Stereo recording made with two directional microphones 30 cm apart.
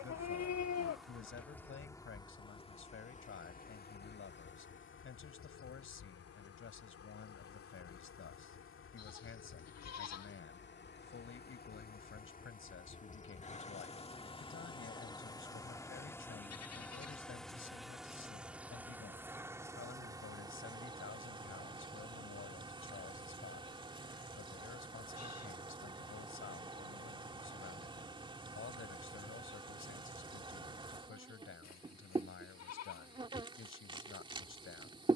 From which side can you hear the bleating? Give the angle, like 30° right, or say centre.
60° left.